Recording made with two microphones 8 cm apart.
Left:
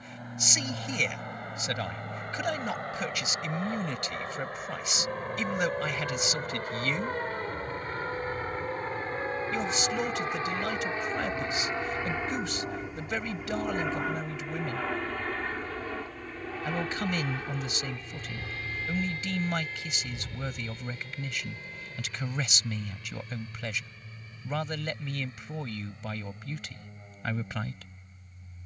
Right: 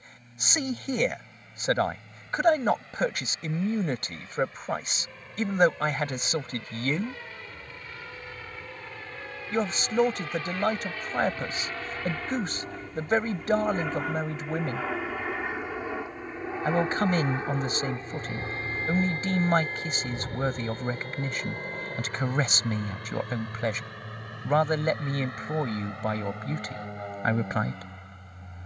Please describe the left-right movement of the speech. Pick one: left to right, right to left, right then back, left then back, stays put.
stays put.